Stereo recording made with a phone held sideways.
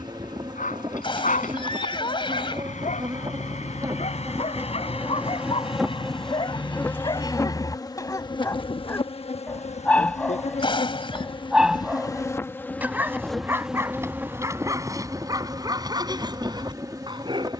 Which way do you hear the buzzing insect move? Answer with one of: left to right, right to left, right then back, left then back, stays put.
left then back.